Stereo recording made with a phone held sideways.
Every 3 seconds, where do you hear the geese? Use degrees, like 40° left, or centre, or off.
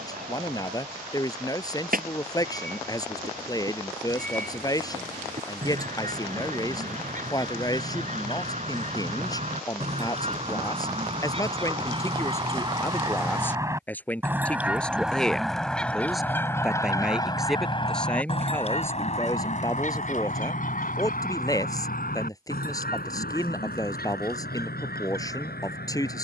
60° right, 60° right, 50° right, 40° right, 20° right, 20° left, 50° left, 70° left, 80° left.